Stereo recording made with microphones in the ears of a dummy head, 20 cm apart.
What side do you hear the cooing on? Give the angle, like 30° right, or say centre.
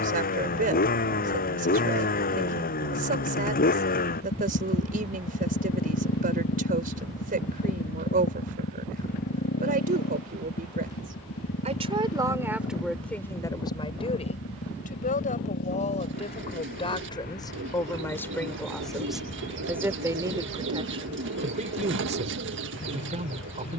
60° right.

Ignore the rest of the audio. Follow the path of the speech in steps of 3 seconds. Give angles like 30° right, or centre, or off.
40° right, 40° right, 40° right, 40° right, 10° left, 30° left, 10° right, 30° right.